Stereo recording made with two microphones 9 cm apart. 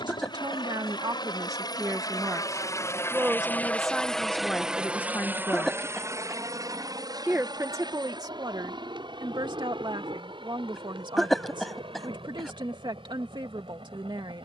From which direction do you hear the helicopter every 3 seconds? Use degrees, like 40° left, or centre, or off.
50° left, centre, 50° right, 60° right, 70° right.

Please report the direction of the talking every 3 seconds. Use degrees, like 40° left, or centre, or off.
40° right, 10° left, 40° right, 60° right, 60° right.